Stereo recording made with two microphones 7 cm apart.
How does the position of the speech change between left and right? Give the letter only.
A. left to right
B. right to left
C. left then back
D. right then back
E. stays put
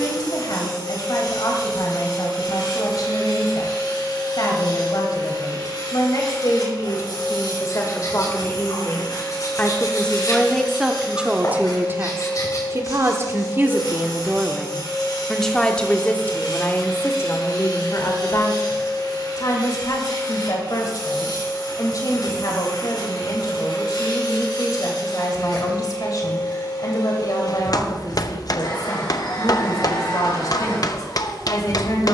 D.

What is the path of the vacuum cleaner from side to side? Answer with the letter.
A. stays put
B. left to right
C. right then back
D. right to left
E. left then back
A.